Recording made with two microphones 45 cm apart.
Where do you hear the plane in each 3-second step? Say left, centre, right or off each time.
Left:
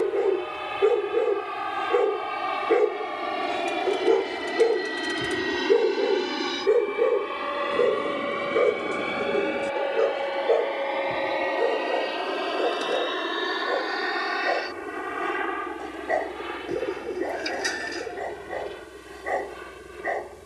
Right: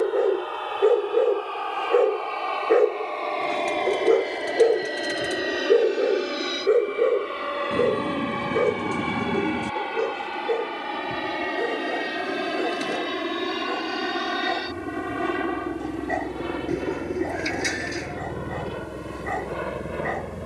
left, left, centre, right, right, right, right.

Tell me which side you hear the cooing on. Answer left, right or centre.
right.